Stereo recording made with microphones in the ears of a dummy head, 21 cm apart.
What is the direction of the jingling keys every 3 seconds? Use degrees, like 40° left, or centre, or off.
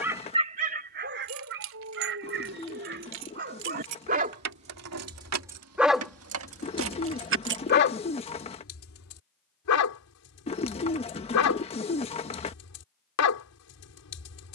80° right, 70° right, 60° right, off, off.